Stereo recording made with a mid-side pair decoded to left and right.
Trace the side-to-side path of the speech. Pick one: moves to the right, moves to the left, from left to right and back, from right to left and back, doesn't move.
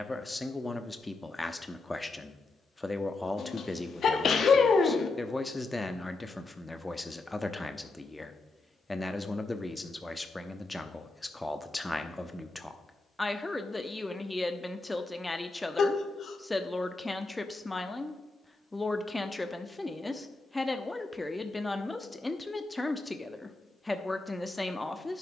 doesn't move.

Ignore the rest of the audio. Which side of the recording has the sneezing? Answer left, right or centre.
left.